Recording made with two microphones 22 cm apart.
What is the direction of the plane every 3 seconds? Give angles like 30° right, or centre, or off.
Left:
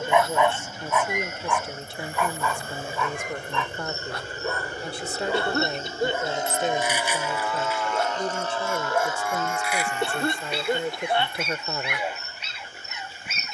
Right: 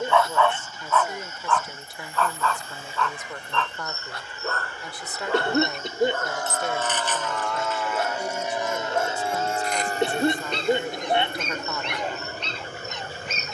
60° left, 50° left, centre, 40° right, 60° right.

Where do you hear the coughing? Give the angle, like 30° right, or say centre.
20° right.